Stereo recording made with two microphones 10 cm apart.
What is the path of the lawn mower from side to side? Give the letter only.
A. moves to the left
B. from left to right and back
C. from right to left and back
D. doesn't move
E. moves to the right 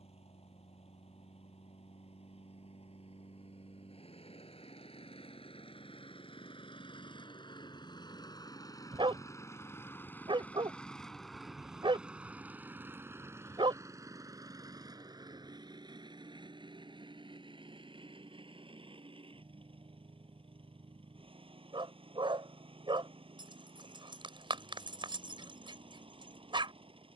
E.